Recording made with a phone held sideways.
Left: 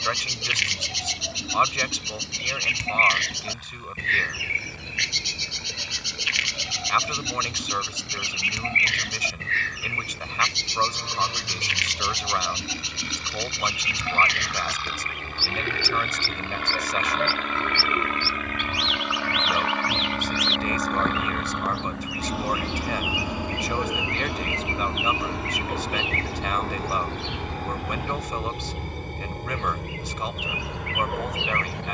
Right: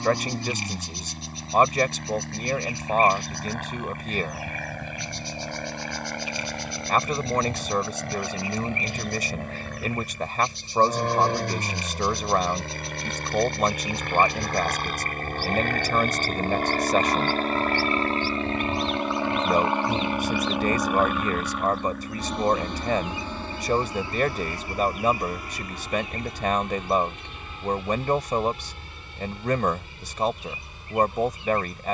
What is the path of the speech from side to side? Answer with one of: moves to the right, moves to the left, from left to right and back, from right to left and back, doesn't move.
doesn't move.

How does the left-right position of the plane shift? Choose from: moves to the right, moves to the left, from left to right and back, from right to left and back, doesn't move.
moves to the left.